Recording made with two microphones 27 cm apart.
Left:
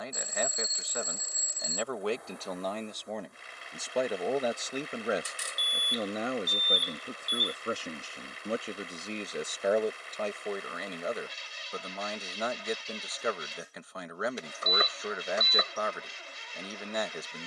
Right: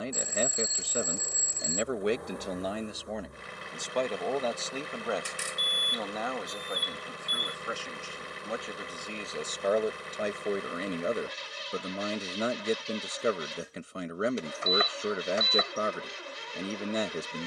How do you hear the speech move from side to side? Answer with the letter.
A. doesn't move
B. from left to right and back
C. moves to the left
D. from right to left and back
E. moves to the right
D.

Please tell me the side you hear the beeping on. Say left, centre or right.
left.